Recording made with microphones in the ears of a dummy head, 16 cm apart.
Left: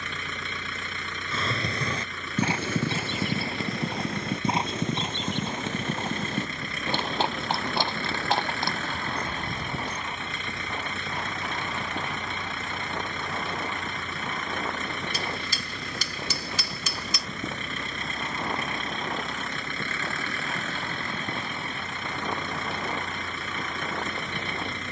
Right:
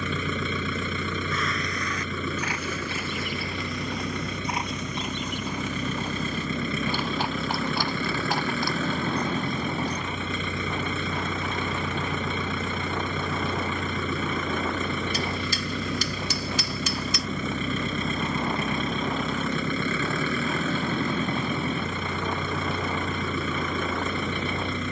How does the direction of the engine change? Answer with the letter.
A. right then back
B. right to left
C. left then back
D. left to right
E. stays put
E.